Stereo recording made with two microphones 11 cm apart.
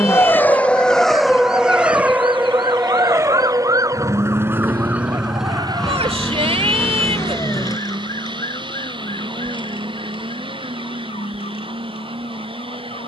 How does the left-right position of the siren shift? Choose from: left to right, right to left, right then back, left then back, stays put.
right to left.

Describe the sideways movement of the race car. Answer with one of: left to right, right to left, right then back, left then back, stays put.
left to right.